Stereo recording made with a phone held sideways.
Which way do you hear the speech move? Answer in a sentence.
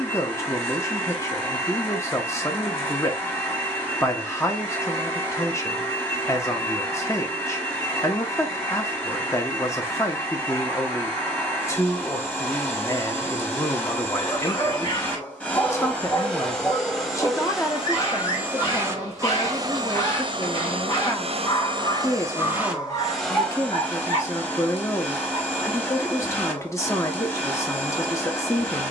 In this clip you hear the speech stay put.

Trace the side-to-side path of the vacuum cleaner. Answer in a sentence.
In this clip you hear the vacuum cleaner move from left to right and back again.